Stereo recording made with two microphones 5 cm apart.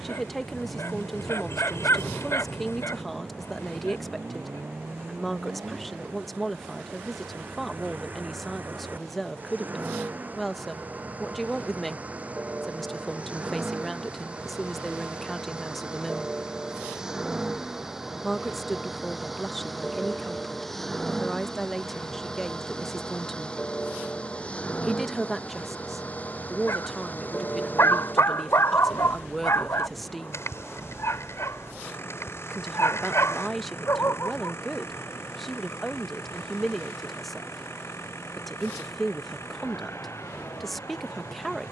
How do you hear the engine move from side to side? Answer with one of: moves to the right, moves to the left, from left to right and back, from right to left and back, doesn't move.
moves to the left.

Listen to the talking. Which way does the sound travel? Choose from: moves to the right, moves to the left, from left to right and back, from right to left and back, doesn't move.
doesn't move.